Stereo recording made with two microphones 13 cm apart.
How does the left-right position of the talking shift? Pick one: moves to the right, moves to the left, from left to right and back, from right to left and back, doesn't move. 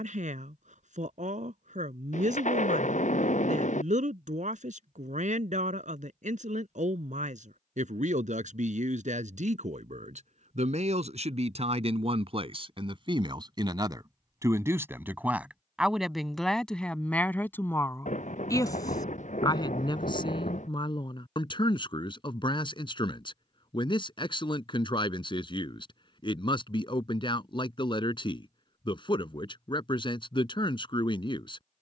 moves to the left.